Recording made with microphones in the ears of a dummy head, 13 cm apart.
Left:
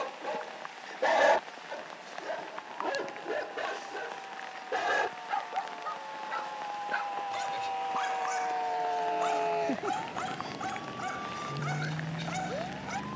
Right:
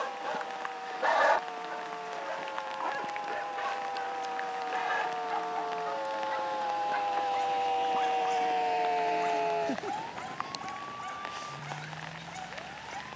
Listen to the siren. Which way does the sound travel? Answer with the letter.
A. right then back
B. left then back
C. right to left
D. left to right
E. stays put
C.